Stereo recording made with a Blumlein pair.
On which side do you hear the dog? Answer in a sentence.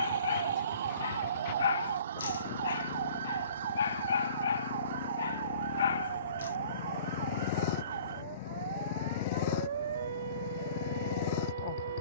You can hear the dog on the left.